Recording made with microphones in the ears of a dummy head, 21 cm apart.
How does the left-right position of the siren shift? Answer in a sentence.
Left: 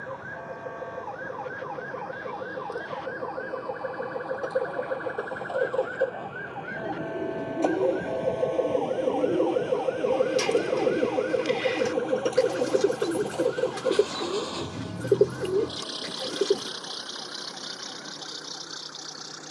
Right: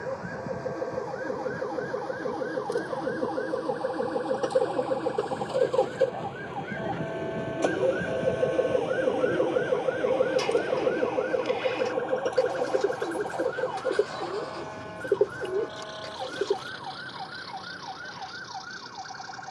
In this clip you hear the siren go from the left side to the right.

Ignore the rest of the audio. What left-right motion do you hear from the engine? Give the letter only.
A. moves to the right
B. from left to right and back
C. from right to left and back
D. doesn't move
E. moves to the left
E.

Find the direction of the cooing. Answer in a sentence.
In this clip you hear the cooing on the left.